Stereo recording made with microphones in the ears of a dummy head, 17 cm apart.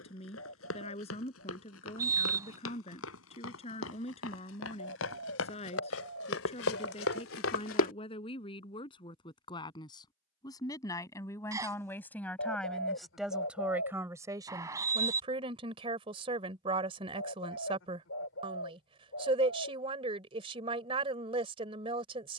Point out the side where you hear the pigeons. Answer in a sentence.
In this clip you hear the pigeons on the left.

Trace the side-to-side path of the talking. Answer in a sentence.
You can hear the talking move to the right.